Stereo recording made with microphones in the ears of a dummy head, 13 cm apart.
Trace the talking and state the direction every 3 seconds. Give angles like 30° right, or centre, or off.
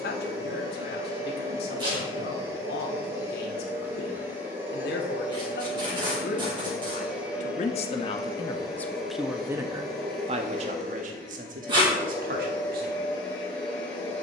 70° left, 70° left, 40° left, 40° right, 60° right.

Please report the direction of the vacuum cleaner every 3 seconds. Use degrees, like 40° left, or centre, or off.
20° right, 10° right, centre, 10° left, 10° left.